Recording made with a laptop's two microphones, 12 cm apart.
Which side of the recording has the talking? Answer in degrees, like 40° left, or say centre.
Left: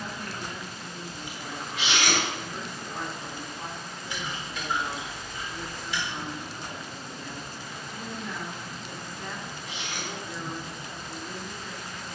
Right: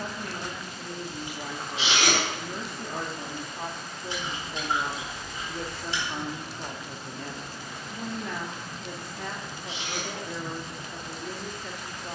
70° right.